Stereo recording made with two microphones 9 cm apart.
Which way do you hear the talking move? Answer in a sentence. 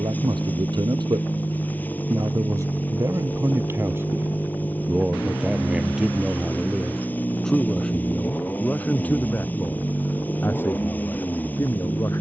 You can hear the talking go from the right side to the left.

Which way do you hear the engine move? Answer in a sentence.
In this clip you hear the engine stay in one place.